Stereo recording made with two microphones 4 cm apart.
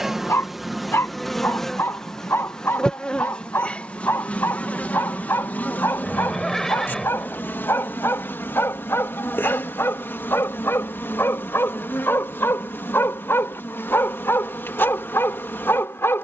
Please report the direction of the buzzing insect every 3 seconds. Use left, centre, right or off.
centre, left, left, left, left, left.